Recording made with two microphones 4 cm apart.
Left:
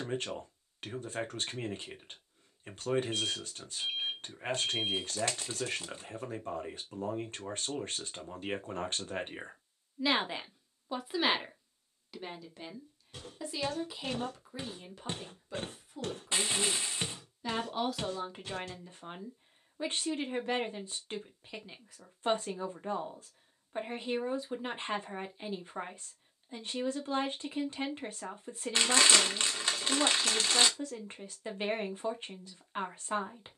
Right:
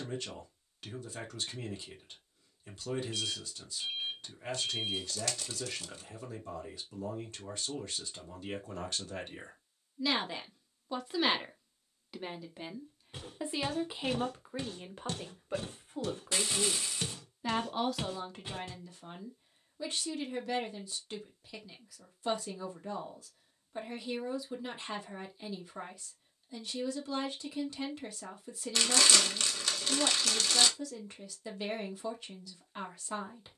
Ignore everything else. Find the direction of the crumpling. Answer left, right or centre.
left.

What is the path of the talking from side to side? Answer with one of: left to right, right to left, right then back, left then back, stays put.
right then back.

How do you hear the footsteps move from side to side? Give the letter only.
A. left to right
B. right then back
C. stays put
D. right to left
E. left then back
E.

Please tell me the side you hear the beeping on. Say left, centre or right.
left.